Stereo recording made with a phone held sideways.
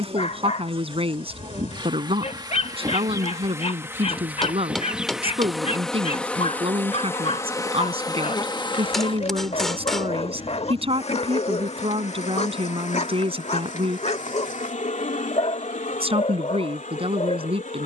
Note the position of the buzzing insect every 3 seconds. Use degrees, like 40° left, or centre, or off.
40° right, 10° right, 20° left, 50° left, 60° left, 70° left.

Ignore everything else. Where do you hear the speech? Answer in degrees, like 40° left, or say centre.
40° right.